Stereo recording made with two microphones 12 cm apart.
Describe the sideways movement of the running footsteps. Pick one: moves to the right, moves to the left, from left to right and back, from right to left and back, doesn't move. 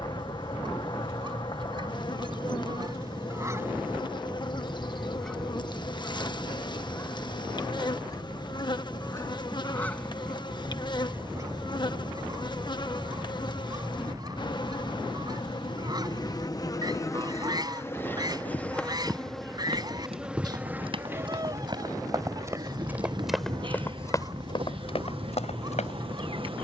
moves to the left.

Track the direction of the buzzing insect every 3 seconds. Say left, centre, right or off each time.
left, left, left, left, left, left, centre, right, right.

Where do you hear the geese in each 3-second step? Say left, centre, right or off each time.
right, centre, left, centre, right, right, right, right, right.